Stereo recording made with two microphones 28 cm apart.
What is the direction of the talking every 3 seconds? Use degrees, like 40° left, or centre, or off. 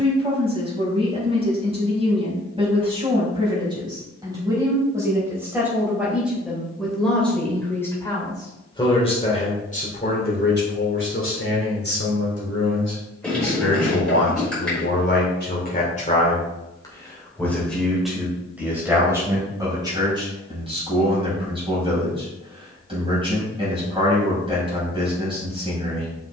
20° right, 10° right, 10° left, 40° left, 60° left, 20° left, 10° right, 20° right, 20° right.